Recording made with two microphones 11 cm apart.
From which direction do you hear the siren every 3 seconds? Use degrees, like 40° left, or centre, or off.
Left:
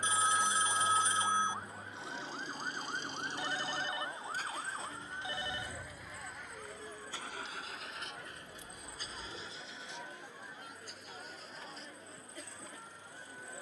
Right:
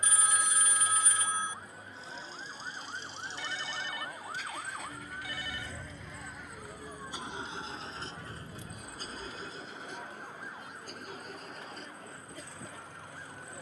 30° left, 10° right, 40° right, 60° right, 70° right.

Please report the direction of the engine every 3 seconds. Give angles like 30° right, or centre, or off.
70° left, 30° left, 20° right, 50° right, 60° right.